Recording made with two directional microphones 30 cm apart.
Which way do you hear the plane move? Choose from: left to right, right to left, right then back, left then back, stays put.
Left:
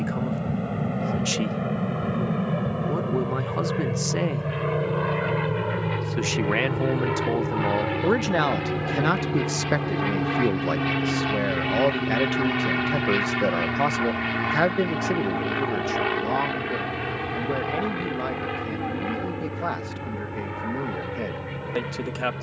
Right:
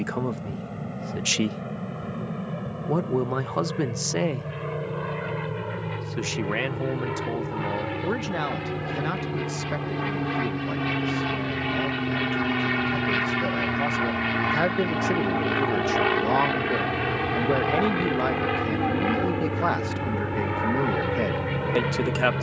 left to right.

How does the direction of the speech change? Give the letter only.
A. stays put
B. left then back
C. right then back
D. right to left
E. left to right
B.